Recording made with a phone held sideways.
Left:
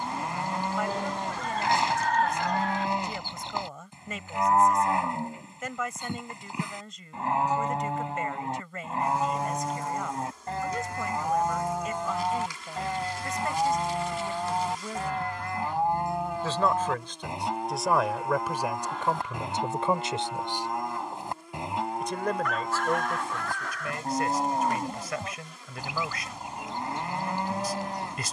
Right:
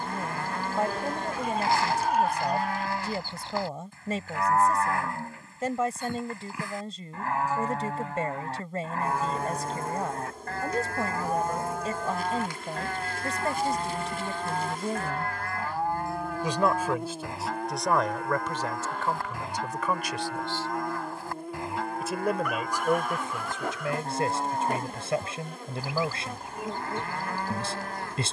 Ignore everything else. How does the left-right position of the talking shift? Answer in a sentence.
You can hear the talking move from right to left and back again.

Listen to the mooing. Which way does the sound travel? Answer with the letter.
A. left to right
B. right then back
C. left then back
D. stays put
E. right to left
D.